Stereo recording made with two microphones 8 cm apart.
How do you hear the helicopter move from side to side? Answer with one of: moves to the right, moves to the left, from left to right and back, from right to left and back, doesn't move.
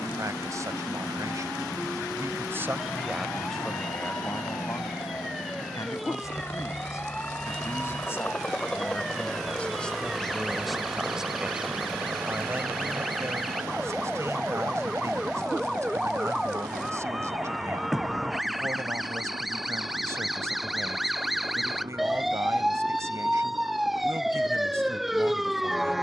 moves to the right.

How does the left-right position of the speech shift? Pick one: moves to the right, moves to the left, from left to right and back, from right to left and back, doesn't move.
from right to left and back.